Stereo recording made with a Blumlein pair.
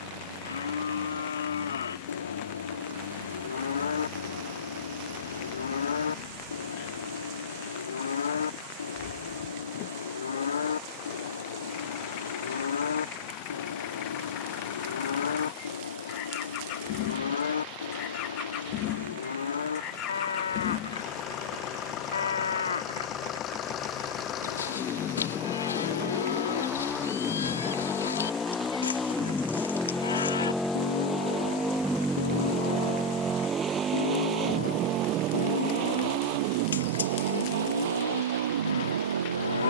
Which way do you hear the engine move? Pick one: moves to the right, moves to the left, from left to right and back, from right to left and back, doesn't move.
moves to the right.